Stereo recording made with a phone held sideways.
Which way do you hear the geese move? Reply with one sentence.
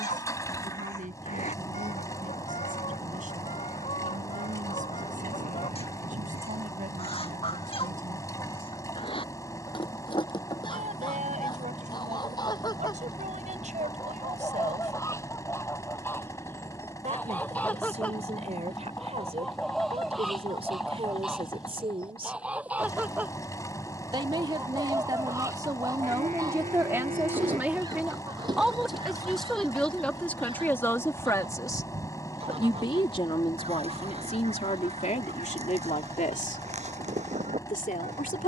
In this clip you hear the geese move to the right.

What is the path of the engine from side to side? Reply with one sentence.
You can hear the engine stay put.